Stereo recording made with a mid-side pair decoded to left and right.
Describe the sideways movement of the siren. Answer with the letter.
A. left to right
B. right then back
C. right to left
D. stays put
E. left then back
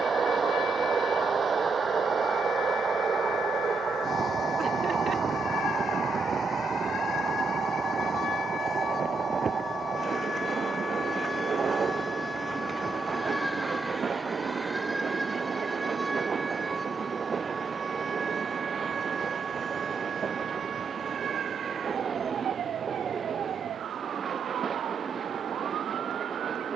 A.